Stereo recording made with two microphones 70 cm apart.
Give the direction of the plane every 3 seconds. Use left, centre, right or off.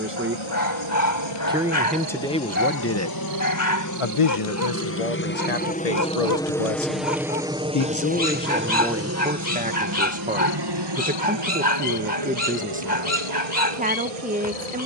left, left, centre, right, right.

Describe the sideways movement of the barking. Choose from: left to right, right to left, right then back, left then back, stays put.
stays put.